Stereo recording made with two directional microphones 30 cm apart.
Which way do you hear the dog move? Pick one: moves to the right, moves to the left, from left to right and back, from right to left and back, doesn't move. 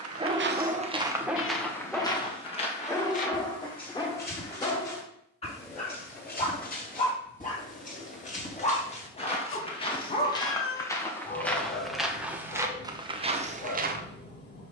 moves to the left.